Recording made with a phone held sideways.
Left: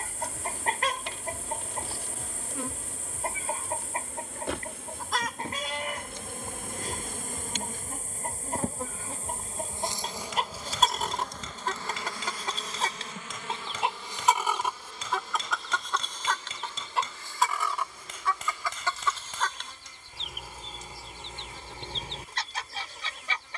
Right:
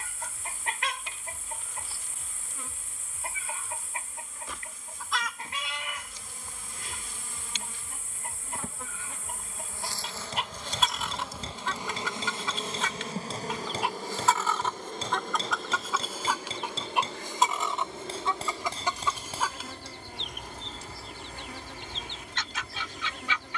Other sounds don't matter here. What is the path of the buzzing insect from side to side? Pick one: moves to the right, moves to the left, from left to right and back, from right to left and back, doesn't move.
moves to the right.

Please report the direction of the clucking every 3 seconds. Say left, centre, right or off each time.
left, left, left, left, left, centre, centre, left.